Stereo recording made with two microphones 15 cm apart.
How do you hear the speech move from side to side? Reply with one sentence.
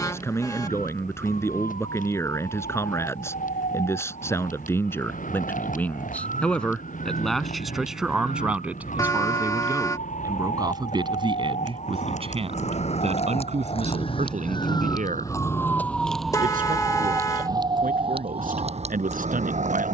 You can hear the speech move to the right.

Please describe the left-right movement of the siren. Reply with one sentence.
In this clip you hear the siren move to the right.